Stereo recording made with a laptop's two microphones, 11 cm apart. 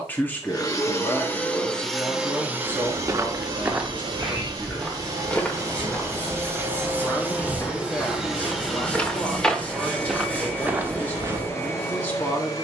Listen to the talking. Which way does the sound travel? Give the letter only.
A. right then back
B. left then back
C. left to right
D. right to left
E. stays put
E.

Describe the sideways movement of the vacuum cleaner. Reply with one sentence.
You can hear the vacuum cleaner go right and come back.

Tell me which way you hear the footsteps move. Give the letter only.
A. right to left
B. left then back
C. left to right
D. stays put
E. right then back
B.